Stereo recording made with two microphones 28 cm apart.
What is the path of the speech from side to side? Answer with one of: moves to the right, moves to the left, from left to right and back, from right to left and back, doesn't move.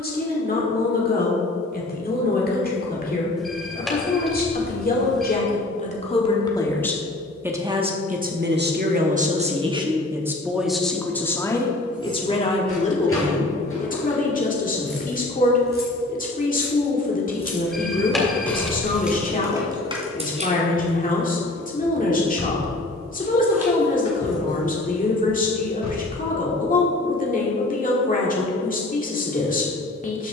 from left to right and back.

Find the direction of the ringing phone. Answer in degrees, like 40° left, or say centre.
centre.